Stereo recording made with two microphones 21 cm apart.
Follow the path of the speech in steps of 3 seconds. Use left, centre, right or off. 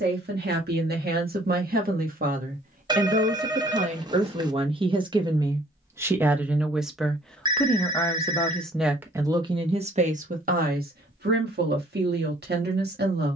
right, right, centre, right, right.